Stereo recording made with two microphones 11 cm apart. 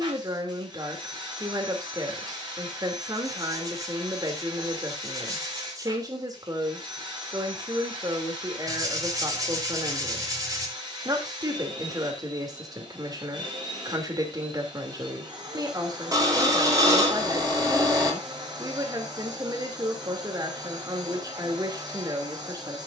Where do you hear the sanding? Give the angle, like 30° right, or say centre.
30° right.